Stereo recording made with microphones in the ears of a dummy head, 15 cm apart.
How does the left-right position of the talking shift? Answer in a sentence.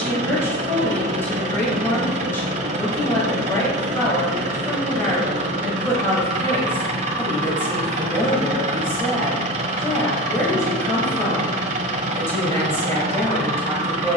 In this clip you hear the talking stay in one place.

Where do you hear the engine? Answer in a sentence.
You can hear the engine on the right.